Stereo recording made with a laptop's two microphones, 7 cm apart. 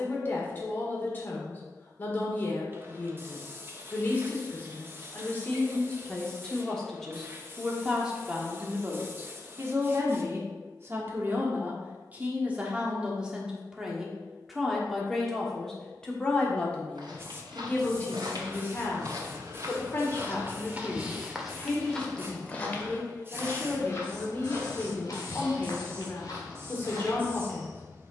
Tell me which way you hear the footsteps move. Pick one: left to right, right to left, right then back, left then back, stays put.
right to left.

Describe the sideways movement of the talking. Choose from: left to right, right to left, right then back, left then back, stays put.
right then back.